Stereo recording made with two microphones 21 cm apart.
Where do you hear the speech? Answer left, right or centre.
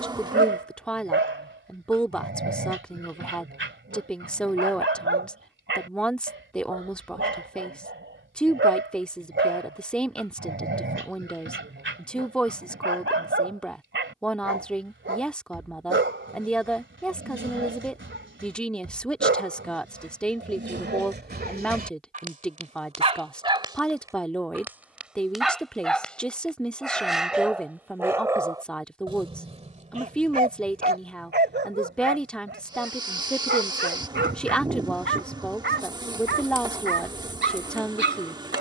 centre.